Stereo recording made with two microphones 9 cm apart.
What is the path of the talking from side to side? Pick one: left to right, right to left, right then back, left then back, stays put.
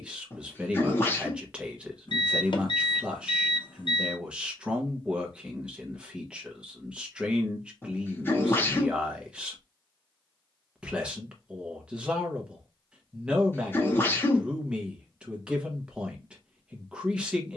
stays put.